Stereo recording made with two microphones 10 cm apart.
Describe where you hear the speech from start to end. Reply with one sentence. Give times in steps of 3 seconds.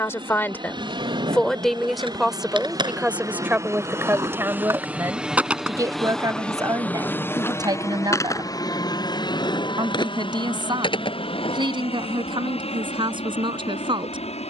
You can hear the speech in the centre from 0 s and on the right from 3 s.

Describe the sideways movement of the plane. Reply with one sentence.
In this clip you hear the plane move to the left.